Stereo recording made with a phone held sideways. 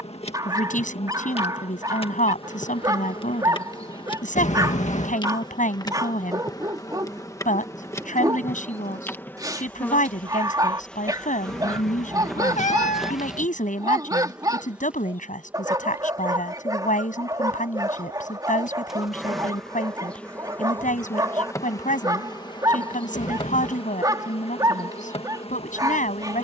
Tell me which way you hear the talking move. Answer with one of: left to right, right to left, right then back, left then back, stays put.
stays put.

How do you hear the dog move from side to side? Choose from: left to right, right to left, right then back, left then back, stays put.
stays put.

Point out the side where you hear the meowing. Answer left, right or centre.
left.